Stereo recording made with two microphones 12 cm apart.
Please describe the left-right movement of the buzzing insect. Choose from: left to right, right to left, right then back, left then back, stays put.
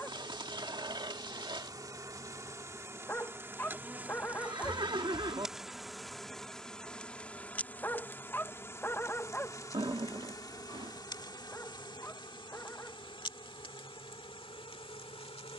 right to left.